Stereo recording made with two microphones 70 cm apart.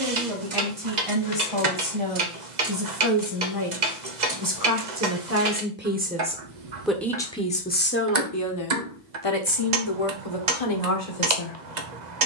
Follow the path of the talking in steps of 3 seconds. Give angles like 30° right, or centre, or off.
40° right, 30° right, 10° left, 50° left.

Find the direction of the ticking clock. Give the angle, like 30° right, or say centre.
80° right.